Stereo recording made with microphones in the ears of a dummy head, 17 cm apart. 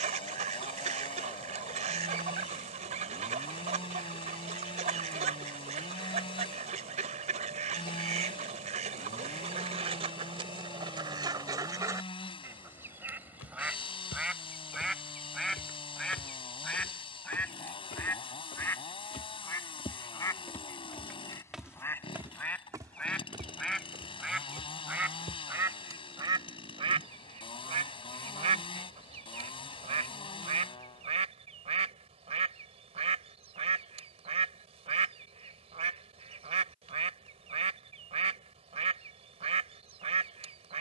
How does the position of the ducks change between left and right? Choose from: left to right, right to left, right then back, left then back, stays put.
left then back.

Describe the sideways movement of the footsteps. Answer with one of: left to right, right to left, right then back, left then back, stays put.
left to right.